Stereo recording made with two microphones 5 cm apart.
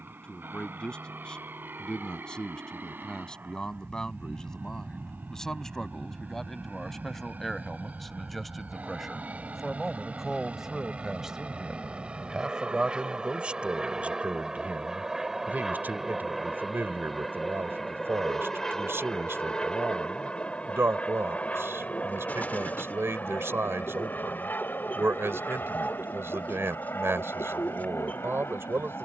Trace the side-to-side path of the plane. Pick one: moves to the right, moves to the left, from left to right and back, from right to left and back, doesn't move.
moves to the left.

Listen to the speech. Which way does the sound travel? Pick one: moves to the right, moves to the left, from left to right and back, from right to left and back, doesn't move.
moves to the right.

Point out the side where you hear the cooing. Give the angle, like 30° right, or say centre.
40° left.